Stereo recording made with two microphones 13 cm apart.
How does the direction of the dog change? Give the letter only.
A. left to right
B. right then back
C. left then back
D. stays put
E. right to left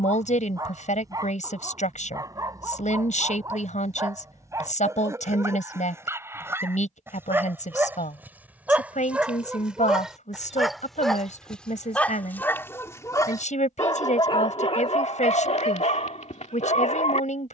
E.